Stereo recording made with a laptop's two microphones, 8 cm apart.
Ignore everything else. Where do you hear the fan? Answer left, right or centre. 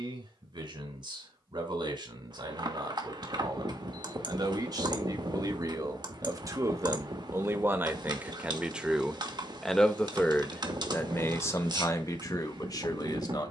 right.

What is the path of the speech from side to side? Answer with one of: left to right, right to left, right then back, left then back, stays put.
right to left.